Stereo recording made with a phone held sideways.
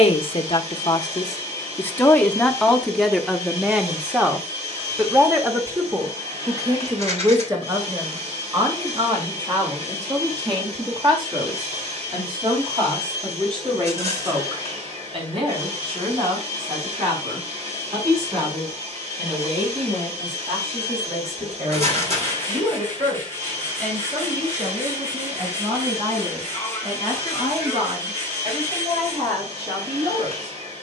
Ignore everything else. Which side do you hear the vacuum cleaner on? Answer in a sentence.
You can hear the vacuum cleaner on the right.